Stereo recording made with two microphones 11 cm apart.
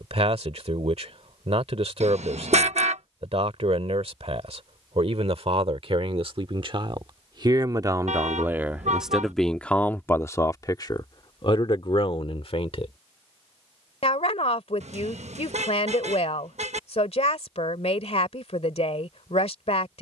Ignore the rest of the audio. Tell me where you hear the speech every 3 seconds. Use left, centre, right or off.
right, right, right, left, left, left, left.